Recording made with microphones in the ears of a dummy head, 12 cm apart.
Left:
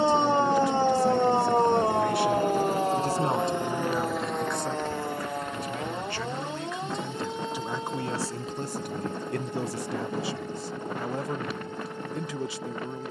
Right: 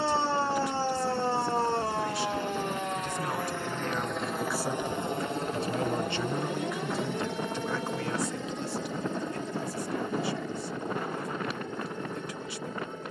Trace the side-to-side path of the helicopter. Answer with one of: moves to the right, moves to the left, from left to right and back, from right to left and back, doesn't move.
moves to the right.